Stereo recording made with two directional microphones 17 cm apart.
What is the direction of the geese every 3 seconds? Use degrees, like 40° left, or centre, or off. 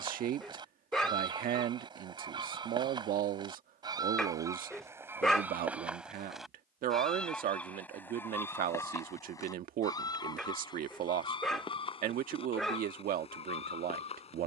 30° right, 20° right, 10° left, 30° left, 40° left.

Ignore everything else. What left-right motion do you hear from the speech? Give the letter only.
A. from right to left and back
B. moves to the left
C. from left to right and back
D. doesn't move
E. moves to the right
D.